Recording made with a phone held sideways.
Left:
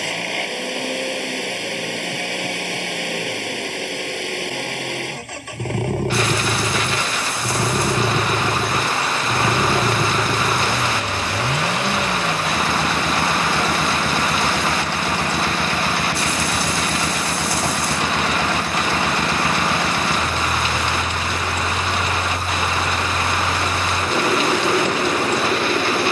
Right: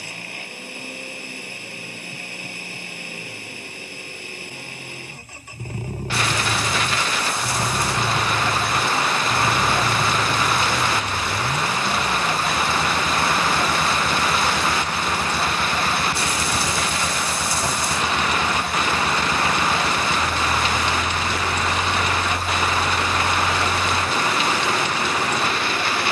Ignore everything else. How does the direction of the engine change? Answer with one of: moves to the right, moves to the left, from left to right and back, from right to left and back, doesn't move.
doesn't move.